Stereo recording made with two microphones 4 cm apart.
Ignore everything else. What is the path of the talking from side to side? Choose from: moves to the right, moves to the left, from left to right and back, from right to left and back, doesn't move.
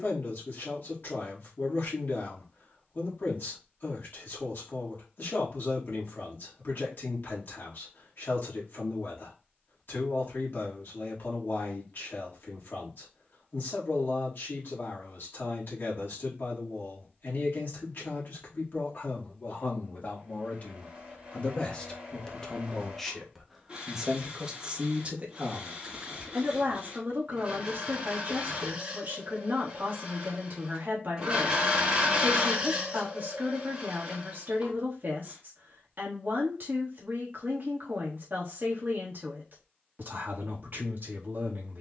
moves to the right.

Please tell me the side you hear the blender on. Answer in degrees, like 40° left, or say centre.
20° right.